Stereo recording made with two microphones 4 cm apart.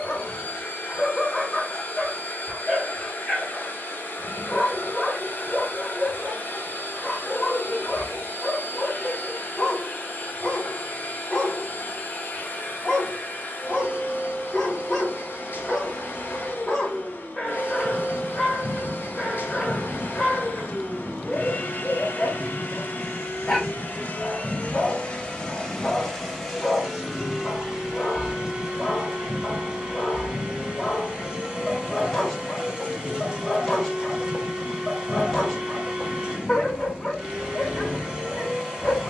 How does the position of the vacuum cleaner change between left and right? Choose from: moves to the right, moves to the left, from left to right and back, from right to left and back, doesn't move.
moves to the right.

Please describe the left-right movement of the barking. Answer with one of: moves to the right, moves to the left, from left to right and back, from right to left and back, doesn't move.
doesn't move.